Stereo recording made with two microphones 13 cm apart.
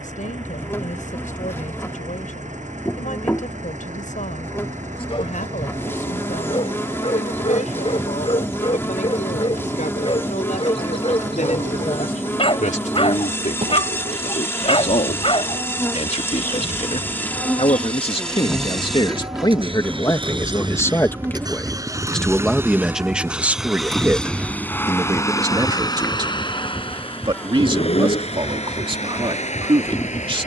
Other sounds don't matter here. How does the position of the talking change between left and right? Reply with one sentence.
In this clip you hear the talking travel towards the right.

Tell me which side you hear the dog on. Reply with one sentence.
In this clip you hear the dog on the left.